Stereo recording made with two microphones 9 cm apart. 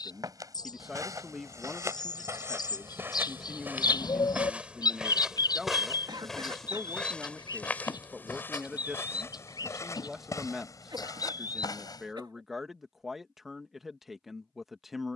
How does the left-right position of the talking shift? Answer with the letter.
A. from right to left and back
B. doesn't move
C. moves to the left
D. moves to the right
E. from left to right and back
B.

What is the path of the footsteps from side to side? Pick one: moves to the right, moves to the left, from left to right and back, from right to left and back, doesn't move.
moves to the left.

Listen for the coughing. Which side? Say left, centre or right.
right.